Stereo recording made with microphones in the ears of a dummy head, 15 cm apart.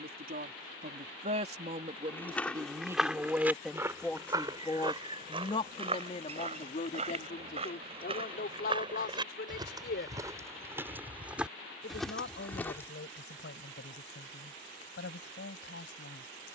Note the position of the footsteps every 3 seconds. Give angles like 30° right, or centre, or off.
10° left, 20° right, 40° right, 20° right, 10° left, off.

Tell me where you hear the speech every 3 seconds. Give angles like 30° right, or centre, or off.
30° right, 10° left, 50° left, 60° left, 70° left, 70° left.